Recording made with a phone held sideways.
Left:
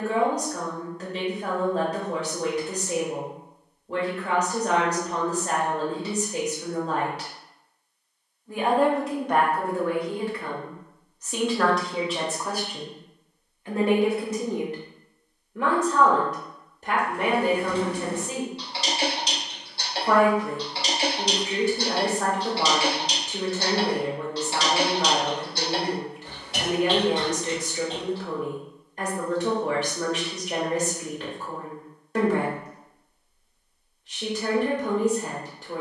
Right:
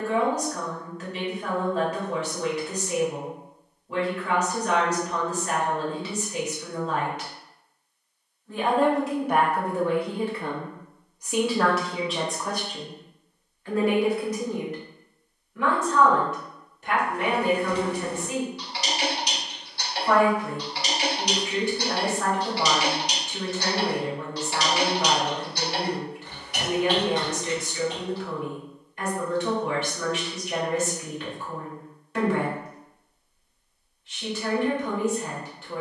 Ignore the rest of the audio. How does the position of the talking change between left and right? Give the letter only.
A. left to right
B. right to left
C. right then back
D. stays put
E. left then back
C.